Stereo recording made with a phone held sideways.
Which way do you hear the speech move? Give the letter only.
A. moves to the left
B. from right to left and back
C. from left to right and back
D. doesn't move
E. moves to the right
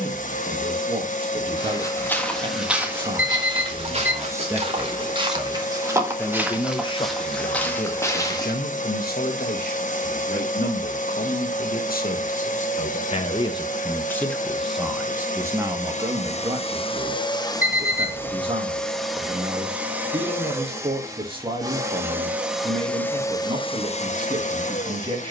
B.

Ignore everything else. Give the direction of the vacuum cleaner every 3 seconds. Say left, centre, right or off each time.
left, left, left, left, left, left, centre, centre, left.